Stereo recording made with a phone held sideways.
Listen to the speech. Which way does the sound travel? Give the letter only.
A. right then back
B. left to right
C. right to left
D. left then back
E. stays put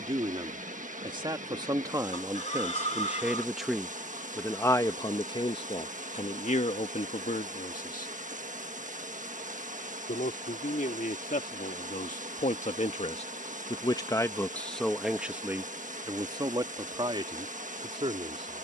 D.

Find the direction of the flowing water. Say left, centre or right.
right.